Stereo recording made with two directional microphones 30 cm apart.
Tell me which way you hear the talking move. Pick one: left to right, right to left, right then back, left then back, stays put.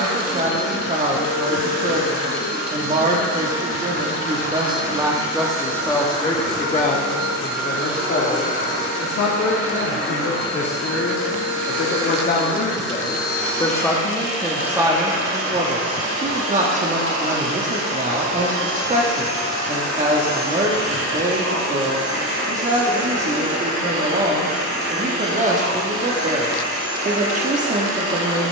left then back.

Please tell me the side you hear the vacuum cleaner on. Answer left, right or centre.
right.